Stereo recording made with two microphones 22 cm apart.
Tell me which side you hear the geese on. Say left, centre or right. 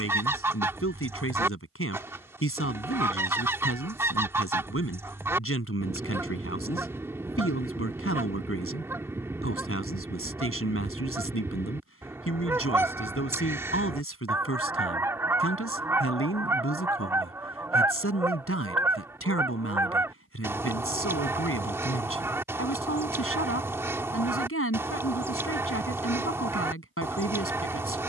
centre.